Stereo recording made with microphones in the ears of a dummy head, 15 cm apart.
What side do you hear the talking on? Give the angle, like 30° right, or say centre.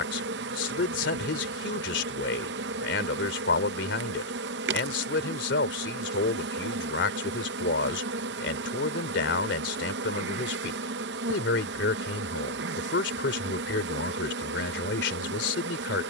80° left.